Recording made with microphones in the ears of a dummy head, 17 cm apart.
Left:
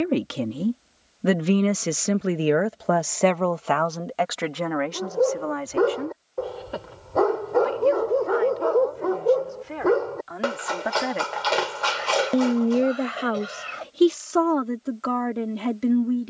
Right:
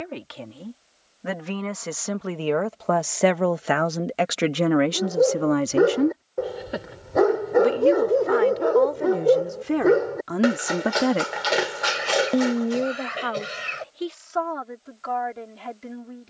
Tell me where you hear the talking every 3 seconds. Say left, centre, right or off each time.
left, right, right, right, left, left.